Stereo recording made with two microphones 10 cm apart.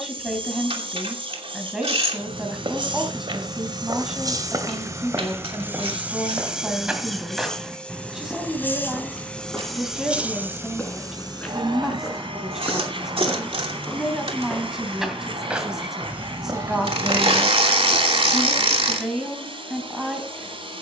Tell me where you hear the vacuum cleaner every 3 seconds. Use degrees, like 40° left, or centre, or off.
60° right, 40° right, centre, 20° right, 70° right, 70° right, 70° right.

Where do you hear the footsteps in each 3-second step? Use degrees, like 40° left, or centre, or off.
70° right, 40° right, 10° right, 10° left, 10° left, 30° right, off.